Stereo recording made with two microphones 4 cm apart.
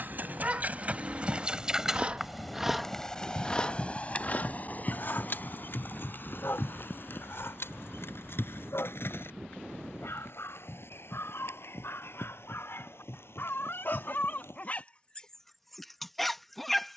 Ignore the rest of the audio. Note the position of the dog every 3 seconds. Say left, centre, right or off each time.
right, left, left, left, left, centre.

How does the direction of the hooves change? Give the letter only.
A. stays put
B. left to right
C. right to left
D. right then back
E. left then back
C.